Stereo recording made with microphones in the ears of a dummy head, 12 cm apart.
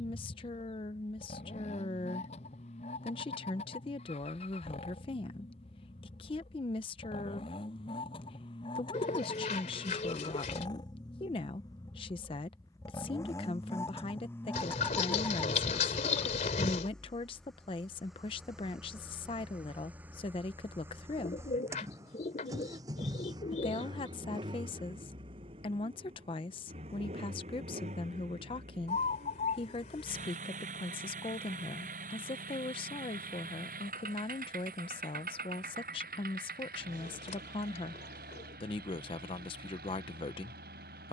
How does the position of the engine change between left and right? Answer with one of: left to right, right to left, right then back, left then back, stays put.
left to right.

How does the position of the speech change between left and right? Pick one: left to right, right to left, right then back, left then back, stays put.
stays put.